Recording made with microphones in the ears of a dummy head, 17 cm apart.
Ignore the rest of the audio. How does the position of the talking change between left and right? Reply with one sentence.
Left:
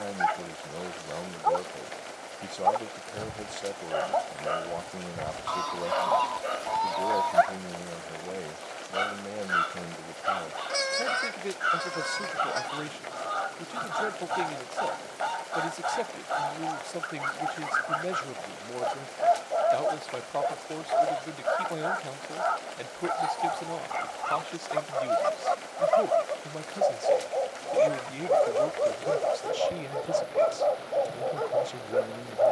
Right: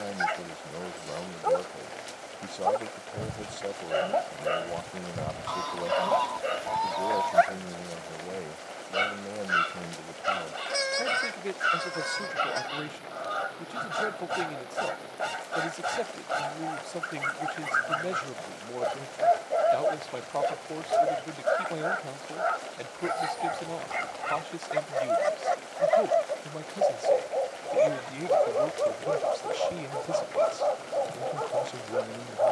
You can hear the talking stay put.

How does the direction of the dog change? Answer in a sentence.
You can hear the dog move from right to left.